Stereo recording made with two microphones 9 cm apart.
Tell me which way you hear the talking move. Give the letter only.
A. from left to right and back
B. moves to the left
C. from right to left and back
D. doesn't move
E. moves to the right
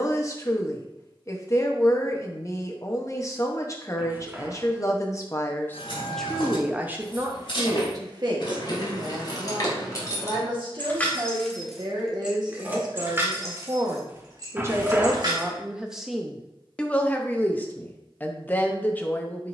A.